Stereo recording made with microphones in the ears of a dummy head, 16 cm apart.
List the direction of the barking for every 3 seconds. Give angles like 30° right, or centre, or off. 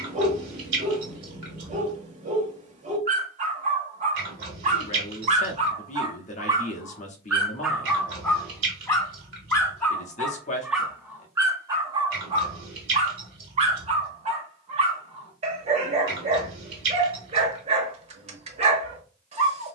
40° right, 40° right, centre, centre, 30° right, 40° right, 40° right.